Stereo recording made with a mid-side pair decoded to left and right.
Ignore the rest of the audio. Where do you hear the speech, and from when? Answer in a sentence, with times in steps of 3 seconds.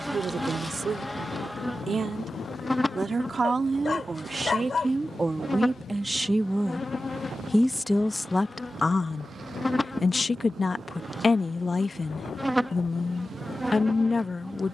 You can hear the speech on the right from 0 s, in the centre from 6 s and on the left from 9 s.